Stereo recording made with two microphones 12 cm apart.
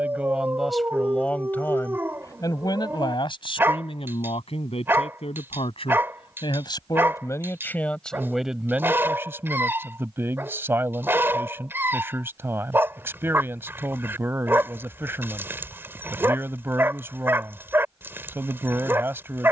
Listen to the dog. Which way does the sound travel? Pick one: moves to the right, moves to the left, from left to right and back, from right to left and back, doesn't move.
doesn't move.